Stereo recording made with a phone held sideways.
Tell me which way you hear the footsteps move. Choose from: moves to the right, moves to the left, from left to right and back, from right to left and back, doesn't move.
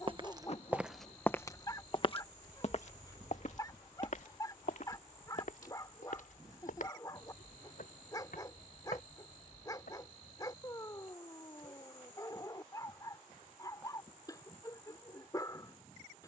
moves to the left.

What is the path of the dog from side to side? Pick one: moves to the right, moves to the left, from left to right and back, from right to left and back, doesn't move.
doesn't move.